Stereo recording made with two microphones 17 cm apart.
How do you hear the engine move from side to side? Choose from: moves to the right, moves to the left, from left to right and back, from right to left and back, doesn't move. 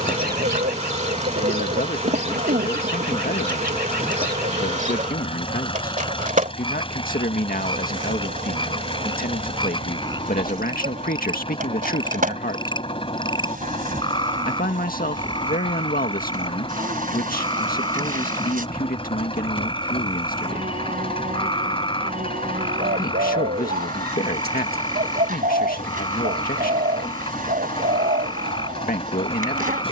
doesn't move.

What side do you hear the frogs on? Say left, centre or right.
left.